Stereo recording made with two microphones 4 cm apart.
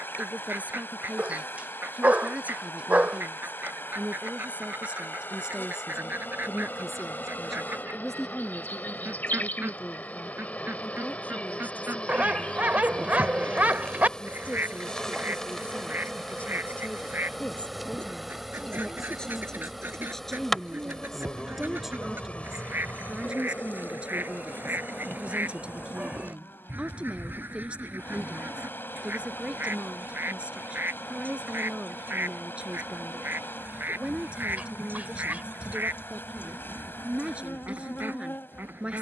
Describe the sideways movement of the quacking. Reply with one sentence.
You can hear the quacking stay in one place.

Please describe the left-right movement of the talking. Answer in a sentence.
In this clip you hear the talking move from right to left and back again.